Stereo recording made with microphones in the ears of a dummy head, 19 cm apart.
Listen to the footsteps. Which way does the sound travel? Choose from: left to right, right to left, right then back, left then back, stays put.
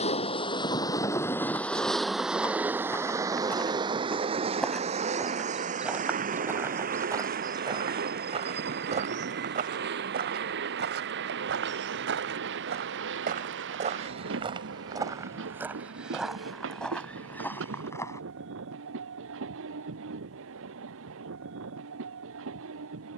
right then back.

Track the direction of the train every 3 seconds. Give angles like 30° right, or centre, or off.
10° left, 30° right, 40° right, 50° right, 60° right, 60° right, 60° right, 60° right.